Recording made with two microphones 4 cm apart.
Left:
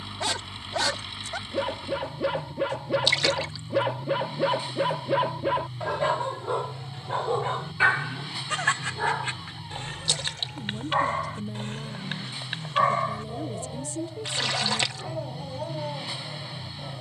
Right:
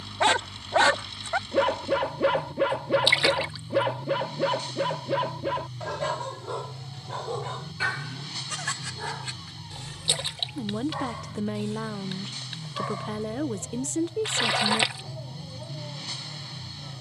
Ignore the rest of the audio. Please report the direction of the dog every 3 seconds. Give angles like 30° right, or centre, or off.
30° right, centre, 30° left, 40° left, 50° left, 50° left.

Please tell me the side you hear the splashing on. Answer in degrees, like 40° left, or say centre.
20° right.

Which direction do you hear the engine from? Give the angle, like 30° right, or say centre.
20° left.